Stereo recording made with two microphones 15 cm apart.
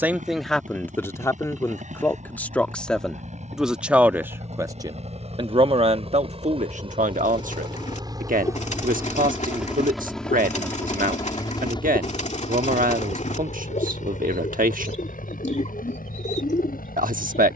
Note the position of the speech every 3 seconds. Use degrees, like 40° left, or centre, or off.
10° left, 20° right, 60° right, 70° right, 70° right, 70° right.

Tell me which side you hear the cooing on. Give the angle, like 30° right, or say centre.
50° left.